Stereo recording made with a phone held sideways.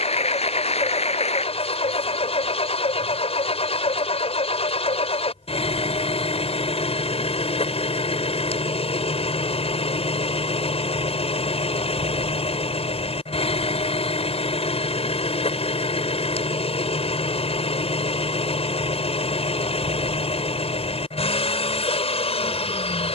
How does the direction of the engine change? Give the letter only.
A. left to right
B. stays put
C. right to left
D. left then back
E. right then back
B.